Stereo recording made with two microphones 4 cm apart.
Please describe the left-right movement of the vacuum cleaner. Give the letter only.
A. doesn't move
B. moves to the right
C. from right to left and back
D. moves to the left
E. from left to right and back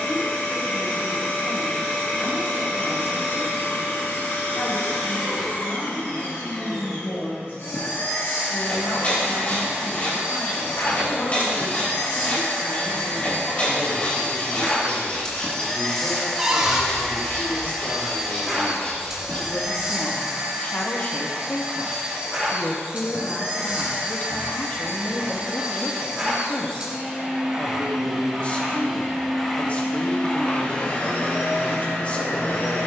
E.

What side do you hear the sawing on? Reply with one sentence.
You can hear the sawing on the left.